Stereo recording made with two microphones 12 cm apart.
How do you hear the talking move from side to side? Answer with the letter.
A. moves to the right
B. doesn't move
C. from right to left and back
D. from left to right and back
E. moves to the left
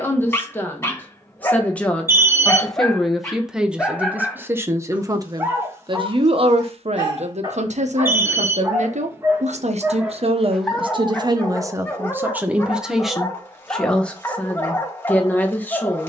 D.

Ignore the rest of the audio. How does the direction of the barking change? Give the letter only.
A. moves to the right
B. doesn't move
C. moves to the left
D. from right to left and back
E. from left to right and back
E.